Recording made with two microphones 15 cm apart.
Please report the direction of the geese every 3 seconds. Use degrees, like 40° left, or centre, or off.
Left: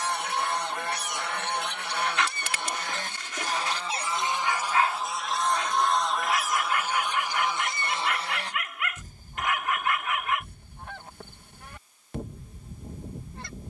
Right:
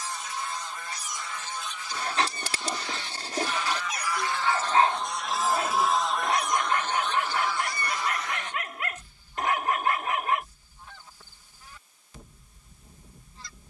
60° left, 10° left, 20° left, 60° left, 60° left.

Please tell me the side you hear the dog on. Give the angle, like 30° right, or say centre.
40° right.